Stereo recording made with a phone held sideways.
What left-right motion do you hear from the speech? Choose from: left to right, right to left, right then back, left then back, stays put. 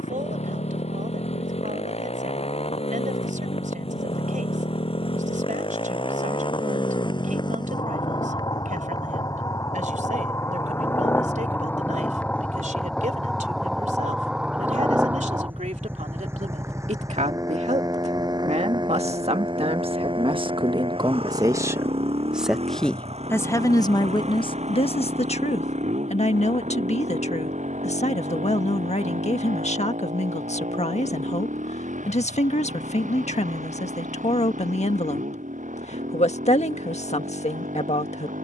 right to left.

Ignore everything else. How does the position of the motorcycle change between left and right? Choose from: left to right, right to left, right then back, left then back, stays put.
left to right.